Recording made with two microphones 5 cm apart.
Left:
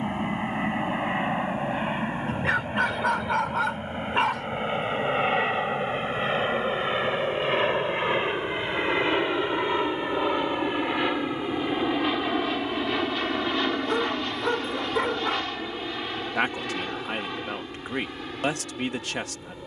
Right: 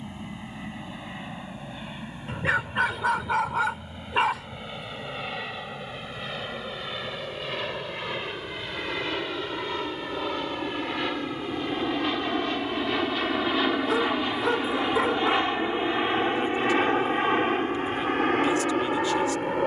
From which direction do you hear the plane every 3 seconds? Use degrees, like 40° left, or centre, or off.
50° left, 40° left, 30° left, 20° left, centre, 30° right, 50° right.